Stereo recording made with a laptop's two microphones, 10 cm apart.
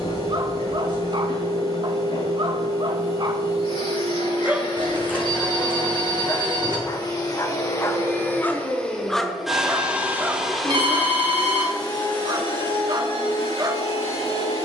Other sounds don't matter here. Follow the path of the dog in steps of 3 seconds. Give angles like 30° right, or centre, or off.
50° right, 10° right, 20° left, 20° right, 40° right.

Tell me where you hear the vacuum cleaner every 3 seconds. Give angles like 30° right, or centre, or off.
60° left, 60° left, 30° left, 10° left, 60° left.